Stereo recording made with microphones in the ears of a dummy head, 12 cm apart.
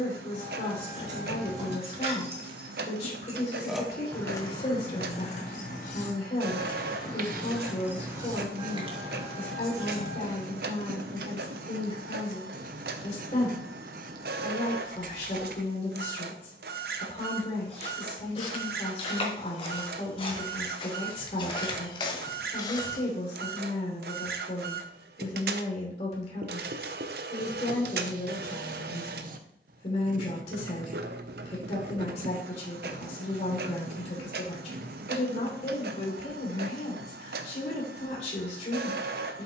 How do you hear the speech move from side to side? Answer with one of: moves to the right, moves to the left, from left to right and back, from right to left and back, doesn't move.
doesn't move.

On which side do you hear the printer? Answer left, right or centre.
right.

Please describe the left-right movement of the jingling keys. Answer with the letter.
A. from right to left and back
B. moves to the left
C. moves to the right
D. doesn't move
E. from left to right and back
A.